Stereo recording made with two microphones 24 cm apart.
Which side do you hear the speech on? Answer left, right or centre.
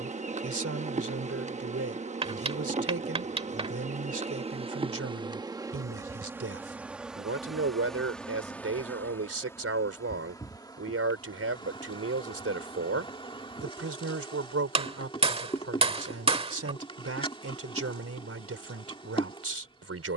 right.